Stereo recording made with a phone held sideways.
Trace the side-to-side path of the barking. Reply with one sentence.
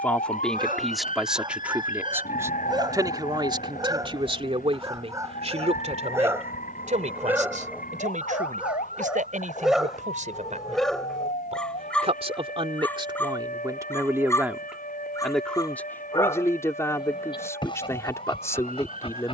In this clip you hear the barking move from right to left.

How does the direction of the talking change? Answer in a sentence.
You can hear the talking move from left to right and back again.